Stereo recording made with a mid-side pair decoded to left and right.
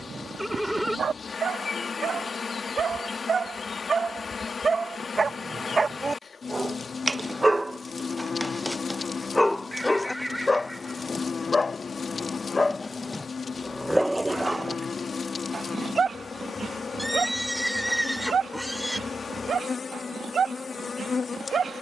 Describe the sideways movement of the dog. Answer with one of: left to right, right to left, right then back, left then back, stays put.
left then back.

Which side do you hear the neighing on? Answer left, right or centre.
centre.